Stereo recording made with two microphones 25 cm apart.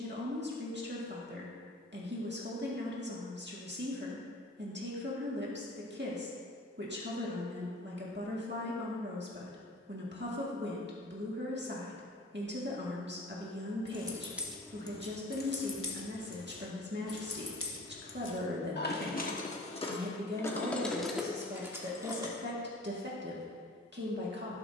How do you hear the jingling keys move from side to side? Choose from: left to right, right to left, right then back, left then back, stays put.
left then back.